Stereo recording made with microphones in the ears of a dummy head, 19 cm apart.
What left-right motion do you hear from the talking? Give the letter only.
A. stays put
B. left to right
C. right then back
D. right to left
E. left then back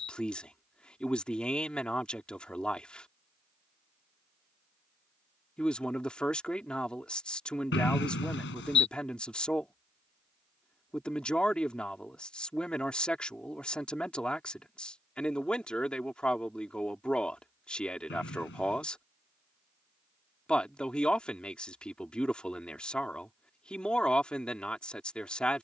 A.